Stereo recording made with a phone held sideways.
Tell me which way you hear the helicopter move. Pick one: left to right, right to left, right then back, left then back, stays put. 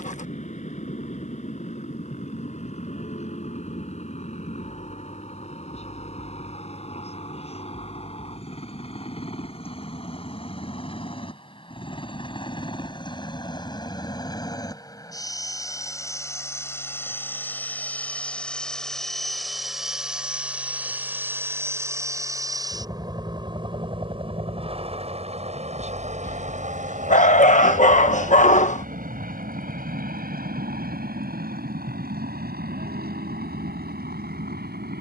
left to right.